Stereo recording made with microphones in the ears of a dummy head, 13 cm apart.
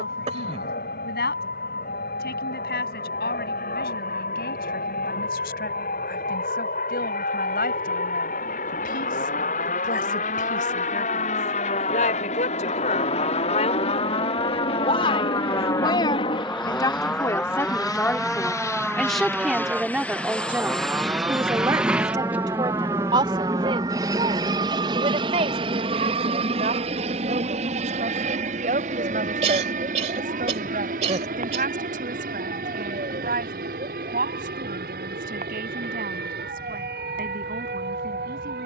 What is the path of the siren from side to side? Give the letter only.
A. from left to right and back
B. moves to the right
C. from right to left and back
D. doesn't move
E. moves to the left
B.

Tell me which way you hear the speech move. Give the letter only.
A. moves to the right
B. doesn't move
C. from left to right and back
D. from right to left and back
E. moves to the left
A.